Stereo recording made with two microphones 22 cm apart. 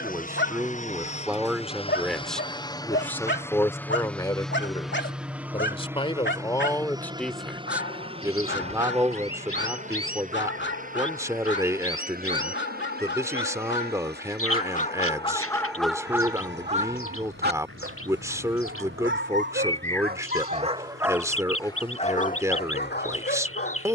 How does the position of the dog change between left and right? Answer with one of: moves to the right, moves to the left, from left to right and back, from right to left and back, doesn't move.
from left to right and back.